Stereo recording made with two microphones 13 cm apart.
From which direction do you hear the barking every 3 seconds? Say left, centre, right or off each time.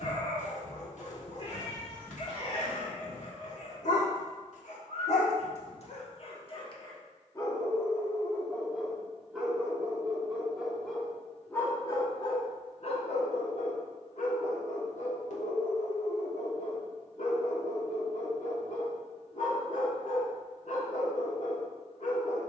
left, left, left, centre, left, left, left, left.